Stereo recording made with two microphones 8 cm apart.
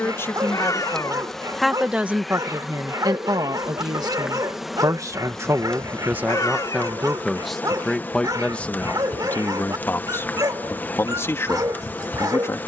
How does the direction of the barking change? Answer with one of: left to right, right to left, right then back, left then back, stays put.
stays put.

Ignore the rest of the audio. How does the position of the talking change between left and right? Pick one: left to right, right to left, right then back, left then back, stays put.
right then back.